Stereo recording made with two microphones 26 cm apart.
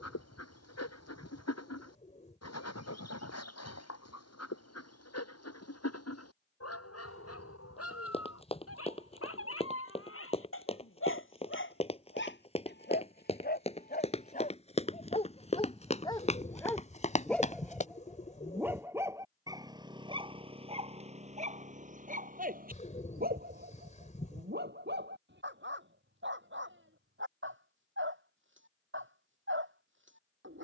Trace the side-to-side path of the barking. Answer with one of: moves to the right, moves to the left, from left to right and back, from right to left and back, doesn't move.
moves to the right.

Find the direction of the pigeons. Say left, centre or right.
left.